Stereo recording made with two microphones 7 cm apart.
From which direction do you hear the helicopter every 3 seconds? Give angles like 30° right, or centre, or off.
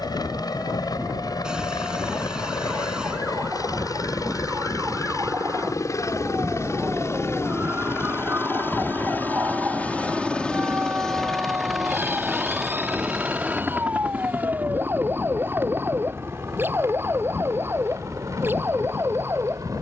70° left, 60° left, 40° left, 10° left, 10° right, 30° right, 50° right.